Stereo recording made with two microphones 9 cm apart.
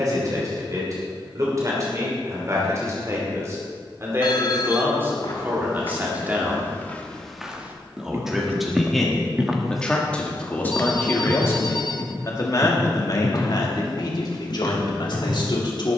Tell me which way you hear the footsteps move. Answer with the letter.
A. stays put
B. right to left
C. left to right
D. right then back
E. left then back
D.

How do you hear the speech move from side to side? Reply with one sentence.
You can hear the speech go from the right side to the left.